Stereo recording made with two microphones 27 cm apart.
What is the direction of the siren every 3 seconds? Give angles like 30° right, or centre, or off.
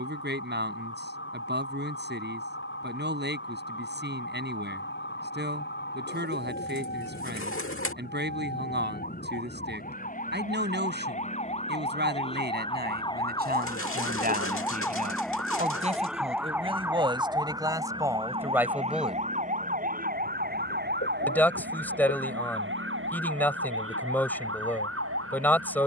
50° left, 50° left, 40° left, 30° left, 20° left, 10° right, 30° right, 50° right, 60° right.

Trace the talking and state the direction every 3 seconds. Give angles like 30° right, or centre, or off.
40° right, 40° right, 40° right, 40° right, 40° right, 20° right, 10° right, 10° left, 10° left.